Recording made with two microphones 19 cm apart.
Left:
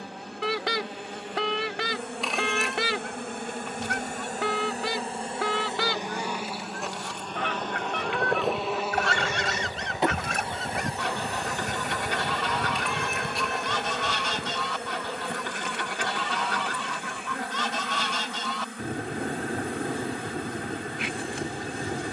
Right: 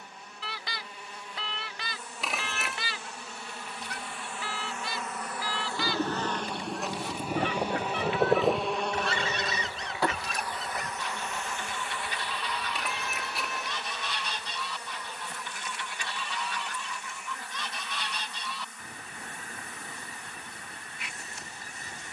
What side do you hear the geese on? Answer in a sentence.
In this clip you hear the geese on the left.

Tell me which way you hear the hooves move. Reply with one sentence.
You can hear the hooves travel towards the left.